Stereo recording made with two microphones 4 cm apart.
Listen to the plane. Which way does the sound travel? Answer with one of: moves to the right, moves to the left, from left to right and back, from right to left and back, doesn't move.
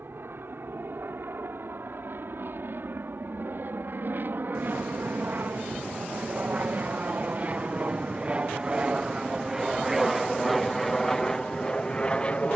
moves to the left.